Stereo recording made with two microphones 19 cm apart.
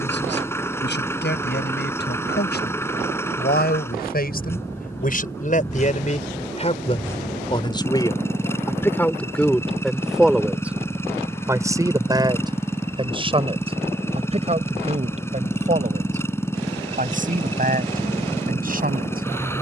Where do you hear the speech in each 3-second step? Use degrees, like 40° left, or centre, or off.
70° left, 50° left, 30° left, centre, 30° right, 40° right, 50° right.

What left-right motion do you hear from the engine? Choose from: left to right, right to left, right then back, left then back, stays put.
stays put.